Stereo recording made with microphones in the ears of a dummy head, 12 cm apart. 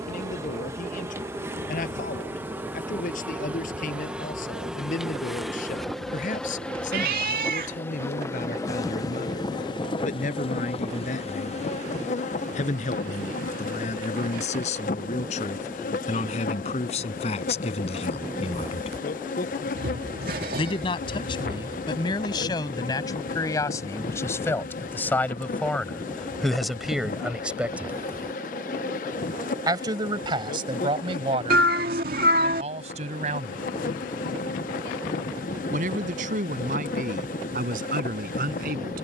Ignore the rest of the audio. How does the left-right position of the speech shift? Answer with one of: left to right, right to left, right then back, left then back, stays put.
left to right.